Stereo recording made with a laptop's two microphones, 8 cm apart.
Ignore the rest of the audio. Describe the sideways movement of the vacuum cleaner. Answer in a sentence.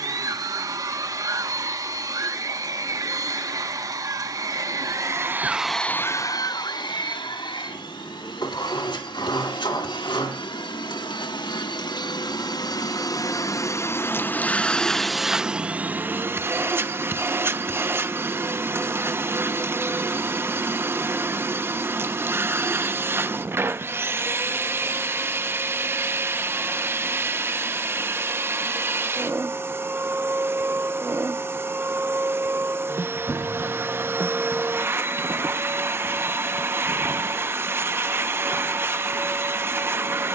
You can hear the vacuum cleaner move from right to left and back again.